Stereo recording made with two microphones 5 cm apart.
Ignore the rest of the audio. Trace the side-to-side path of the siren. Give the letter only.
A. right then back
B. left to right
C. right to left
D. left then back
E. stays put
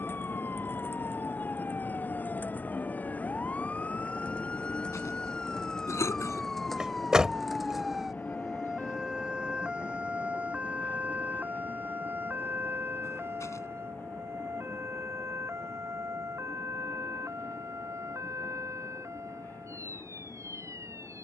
B.